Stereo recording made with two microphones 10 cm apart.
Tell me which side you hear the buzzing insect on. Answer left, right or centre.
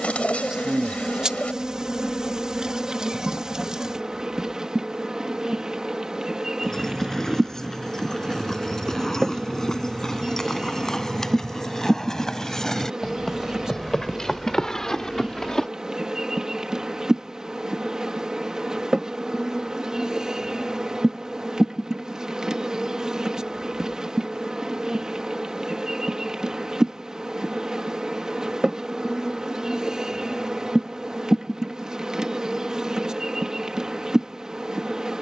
centre.